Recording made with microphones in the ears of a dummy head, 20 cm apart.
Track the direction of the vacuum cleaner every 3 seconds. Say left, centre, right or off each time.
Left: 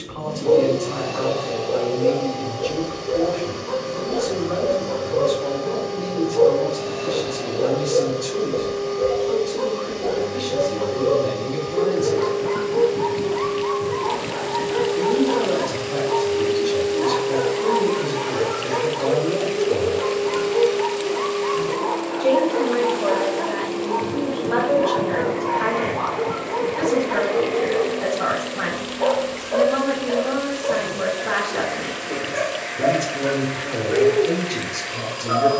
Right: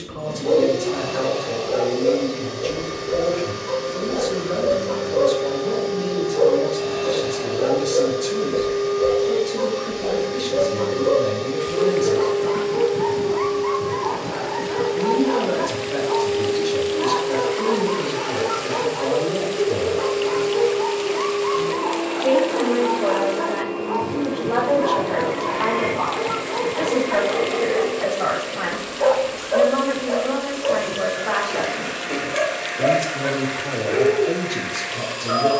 right, right, right, right, right, centre, right, right, right, right, right, right.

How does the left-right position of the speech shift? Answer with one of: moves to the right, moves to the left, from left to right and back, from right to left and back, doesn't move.
moves to the left.